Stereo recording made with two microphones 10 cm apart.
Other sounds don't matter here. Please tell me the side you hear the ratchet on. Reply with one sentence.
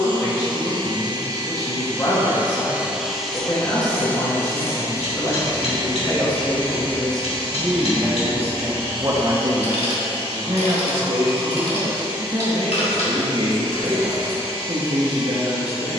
In this clip you hear the ratchet on the left.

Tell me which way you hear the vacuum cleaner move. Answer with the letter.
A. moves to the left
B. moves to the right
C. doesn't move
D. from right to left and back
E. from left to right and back
A.